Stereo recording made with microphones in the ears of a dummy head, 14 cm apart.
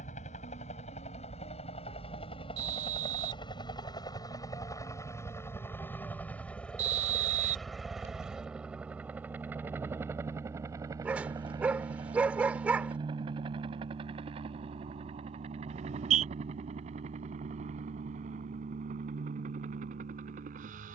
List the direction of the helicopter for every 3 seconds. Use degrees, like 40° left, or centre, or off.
40° left, 20° left, centre, 20° right, 30° right, 40° right, 50° right.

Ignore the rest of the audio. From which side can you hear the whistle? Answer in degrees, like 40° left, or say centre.
50° right.